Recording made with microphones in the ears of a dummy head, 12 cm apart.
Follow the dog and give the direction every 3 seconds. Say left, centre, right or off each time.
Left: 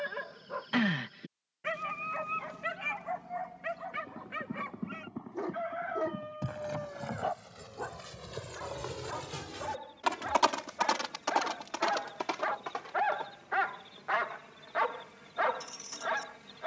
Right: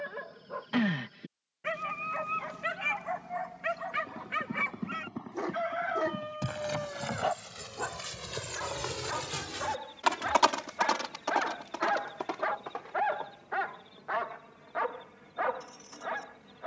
centre, right, right, right, left, left.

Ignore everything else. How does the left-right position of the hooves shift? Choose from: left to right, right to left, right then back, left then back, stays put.
right to left.